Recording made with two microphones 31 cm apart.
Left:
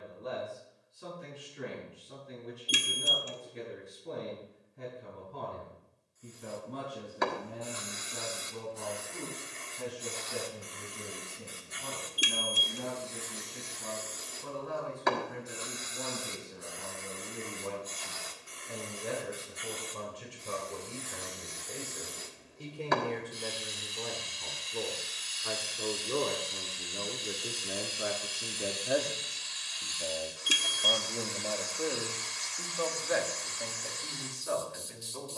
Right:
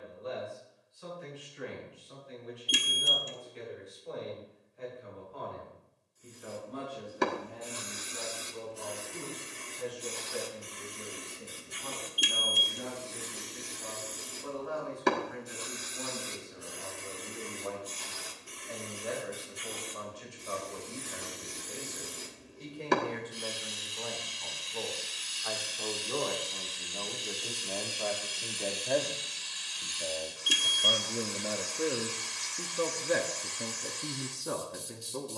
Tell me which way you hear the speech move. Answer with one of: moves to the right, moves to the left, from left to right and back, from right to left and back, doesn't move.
moves to the right.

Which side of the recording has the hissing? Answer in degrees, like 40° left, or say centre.
40° right.